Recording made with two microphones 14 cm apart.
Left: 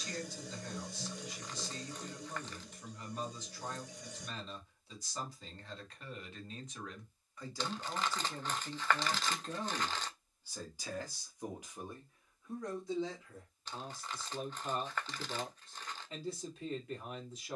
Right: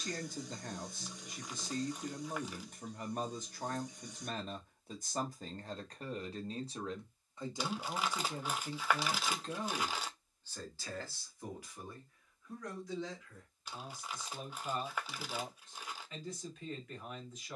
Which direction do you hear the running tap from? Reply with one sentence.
You can hear the running tap on the left.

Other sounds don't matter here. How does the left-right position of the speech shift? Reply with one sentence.
You can hear the speech go from the right side to the left.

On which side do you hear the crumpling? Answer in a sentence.
You can hear the crumpling in the centre.